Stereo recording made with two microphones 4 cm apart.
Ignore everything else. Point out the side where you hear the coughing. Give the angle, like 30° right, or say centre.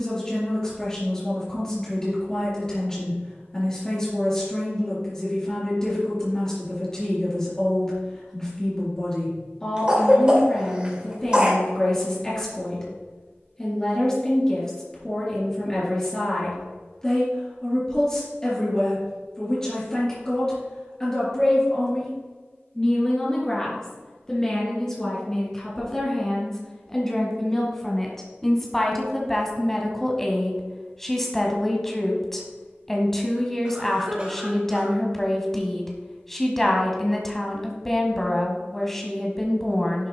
20° right.